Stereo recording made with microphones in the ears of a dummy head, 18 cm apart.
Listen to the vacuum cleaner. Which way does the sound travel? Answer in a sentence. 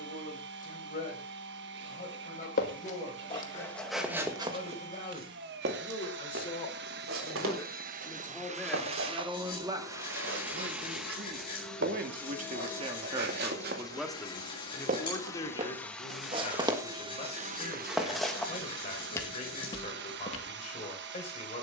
In this clip you hear the vacuum cleaner go left and come back.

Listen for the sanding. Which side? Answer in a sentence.
In this clip you hear the sanding on the left.